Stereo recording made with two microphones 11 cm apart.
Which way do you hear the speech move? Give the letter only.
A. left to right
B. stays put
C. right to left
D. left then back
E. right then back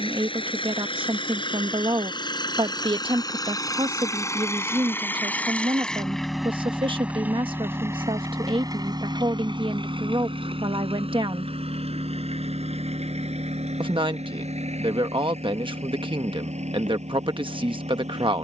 B.